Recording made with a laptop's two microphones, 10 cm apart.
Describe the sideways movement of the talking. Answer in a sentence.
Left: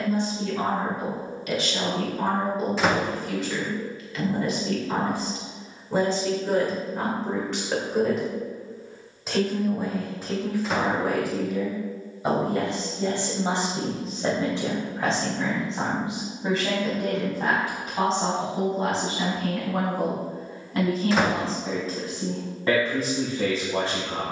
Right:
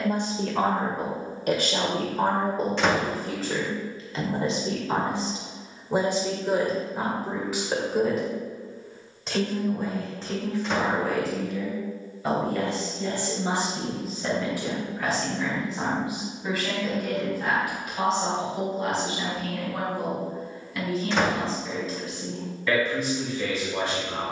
You can hear the talking move to the left.